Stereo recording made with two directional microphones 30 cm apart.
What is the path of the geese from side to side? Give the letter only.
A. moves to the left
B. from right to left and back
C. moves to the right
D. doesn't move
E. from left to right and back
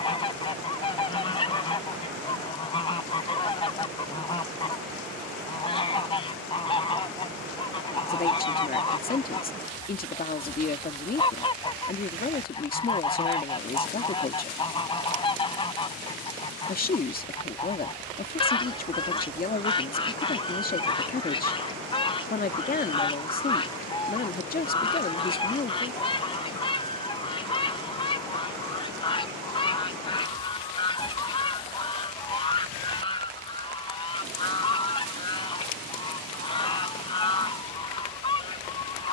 D.